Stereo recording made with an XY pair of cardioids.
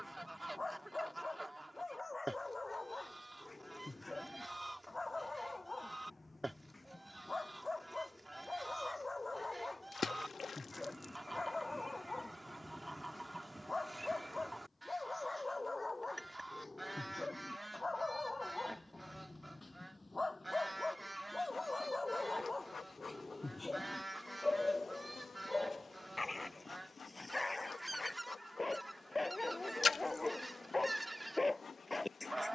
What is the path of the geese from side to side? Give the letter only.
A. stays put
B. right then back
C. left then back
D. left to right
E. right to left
A.